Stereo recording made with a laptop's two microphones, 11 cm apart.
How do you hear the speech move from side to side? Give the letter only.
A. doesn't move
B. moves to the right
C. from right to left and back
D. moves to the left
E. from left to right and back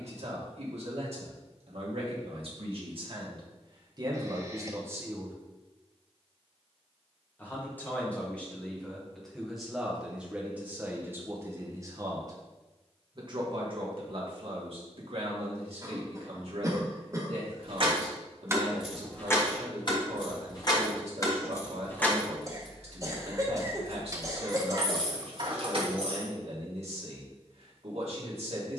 C.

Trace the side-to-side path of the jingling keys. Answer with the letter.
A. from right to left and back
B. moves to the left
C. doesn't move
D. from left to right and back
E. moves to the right
A.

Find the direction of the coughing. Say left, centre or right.
right.